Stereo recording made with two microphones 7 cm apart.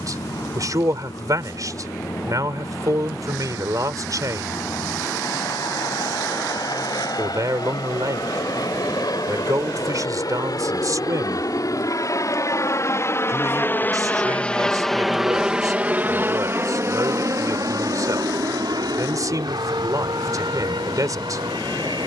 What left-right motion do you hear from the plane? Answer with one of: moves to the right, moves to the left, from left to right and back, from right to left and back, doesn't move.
moves to the right.